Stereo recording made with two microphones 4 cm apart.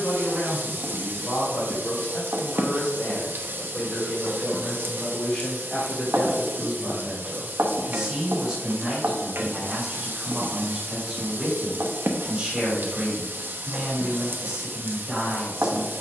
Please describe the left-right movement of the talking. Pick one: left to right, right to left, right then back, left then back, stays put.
left to right.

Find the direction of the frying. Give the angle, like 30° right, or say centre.
50° right.